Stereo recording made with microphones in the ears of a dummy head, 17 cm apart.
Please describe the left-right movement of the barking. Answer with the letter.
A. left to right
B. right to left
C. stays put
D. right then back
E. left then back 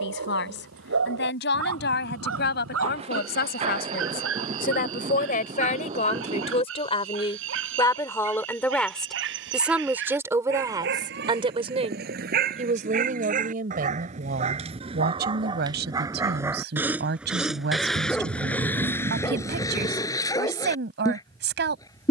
B.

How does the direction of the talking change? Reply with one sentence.
You can hear the talking move to the right.